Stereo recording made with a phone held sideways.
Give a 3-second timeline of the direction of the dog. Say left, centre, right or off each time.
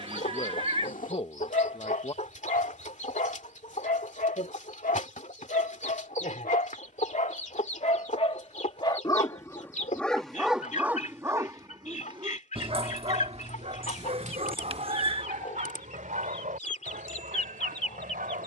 left, left, left, centre, right, right.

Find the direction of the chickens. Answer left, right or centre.
left.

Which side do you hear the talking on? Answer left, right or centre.
left.